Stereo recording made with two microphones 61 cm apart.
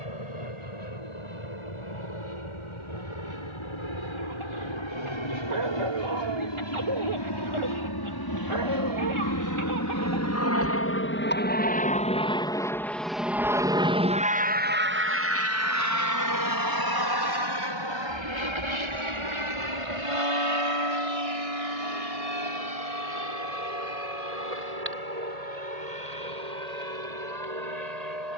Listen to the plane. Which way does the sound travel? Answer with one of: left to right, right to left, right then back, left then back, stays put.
left to right.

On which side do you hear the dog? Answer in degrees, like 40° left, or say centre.
50° right.